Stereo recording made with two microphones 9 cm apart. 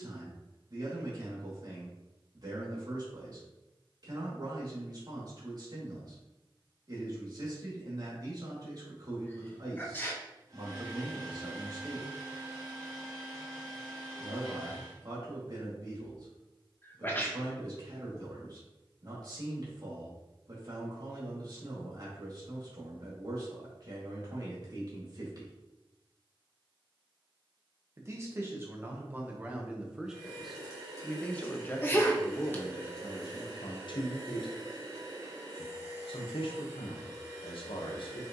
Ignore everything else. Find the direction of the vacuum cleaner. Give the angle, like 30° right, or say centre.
40° right.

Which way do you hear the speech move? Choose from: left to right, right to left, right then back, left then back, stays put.
right to left.